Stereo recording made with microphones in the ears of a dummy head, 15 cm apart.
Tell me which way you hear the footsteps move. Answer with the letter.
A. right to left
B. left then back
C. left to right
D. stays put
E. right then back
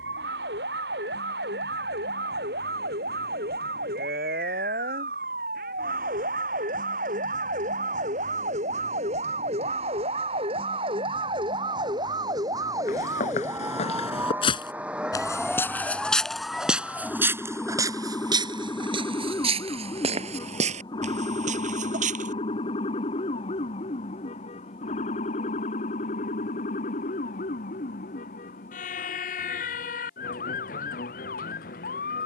C.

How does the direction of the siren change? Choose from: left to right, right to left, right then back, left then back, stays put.
right to left.